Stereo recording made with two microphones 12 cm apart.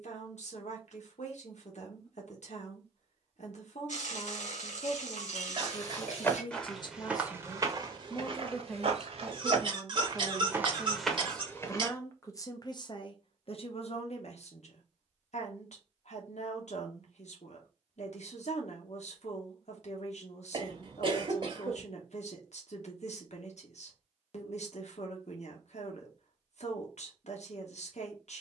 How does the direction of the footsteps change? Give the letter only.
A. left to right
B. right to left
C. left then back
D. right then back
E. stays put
D.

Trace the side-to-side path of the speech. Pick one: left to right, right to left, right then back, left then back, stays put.
right then back.